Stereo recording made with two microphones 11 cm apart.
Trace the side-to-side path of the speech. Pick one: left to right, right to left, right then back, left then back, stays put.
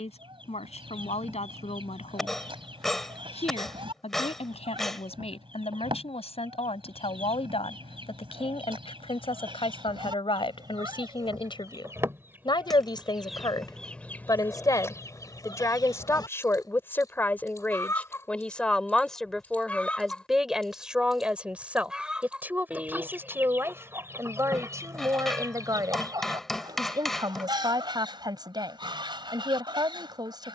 left to right.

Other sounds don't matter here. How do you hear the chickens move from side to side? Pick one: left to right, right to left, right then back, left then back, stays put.
left then back.